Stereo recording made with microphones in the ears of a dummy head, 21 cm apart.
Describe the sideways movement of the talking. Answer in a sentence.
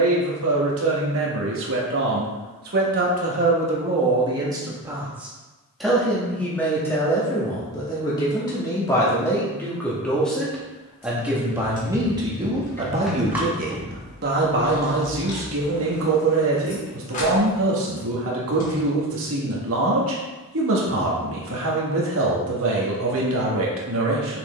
You can hear the talking go left and come back.